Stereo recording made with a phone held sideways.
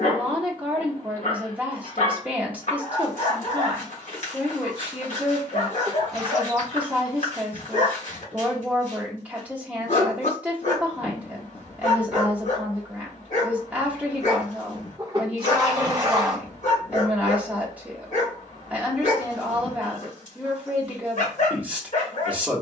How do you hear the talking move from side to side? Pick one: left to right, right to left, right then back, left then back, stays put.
stays put.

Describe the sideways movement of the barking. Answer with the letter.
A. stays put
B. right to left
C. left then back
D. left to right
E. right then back
A.